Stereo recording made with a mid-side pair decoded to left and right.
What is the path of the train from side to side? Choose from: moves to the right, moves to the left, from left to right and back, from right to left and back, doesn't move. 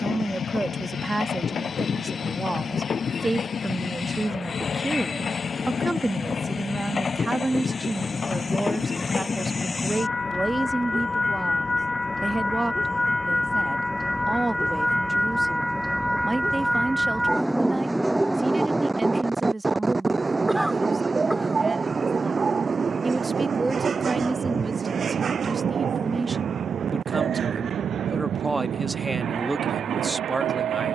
moves to the right.